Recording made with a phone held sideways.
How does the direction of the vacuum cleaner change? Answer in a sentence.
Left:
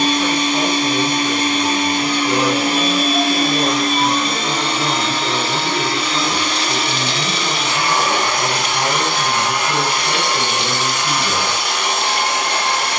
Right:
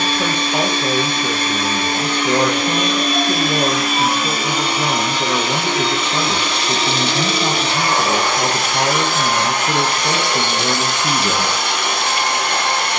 You can hear the vacuum cleaner move from left to right.